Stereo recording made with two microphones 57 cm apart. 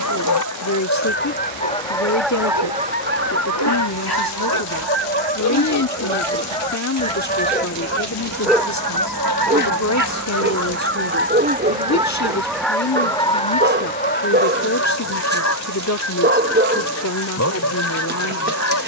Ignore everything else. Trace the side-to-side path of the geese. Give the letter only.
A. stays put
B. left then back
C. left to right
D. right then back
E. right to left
D.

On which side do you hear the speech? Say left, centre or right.
left.